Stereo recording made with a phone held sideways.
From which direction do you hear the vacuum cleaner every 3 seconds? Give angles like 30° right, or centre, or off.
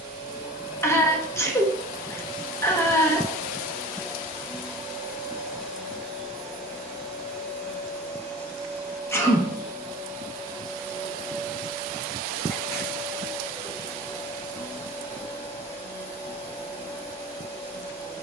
20° right, 10° right, 10° left, 20° left, 20° left, 20° left.